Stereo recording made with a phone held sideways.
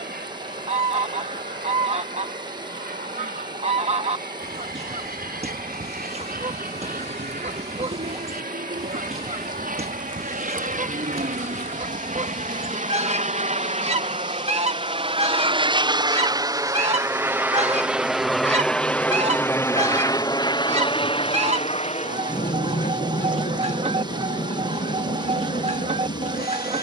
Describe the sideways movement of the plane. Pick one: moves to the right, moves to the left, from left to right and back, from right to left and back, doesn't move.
moves to the left.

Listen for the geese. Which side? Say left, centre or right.
right.